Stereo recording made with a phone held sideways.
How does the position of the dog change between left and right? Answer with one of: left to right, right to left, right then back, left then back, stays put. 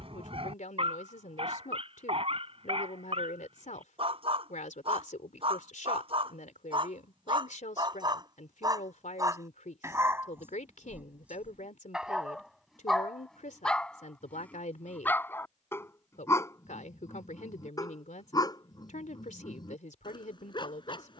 right to left.